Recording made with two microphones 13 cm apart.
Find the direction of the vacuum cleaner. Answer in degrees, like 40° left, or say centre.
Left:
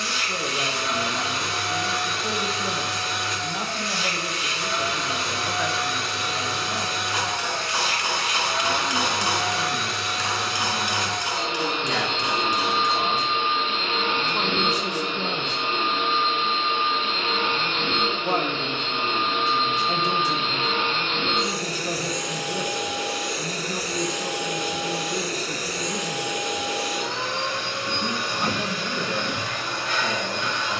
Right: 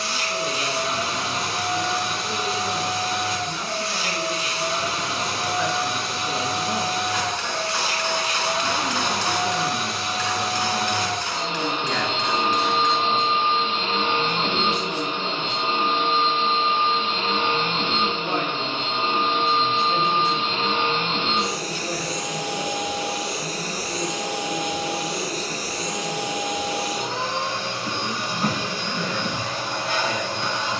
40° right.